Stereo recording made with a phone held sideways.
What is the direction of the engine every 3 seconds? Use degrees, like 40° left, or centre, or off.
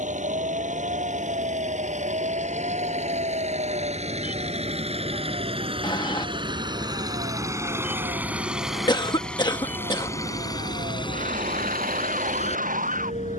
60° right, 50° right, 20° right, 30° left, 50° left.